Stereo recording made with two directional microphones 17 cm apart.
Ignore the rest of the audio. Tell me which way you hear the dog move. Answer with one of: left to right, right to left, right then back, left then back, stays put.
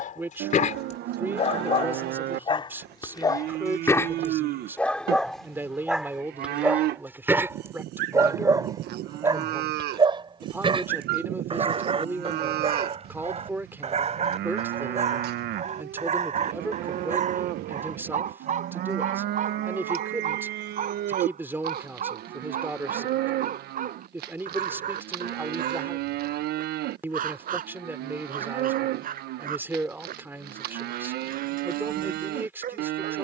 left to right.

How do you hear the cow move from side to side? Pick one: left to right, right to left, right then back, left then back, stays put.
stays put.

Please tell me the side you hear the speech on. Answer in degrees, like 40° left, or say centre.
10° right.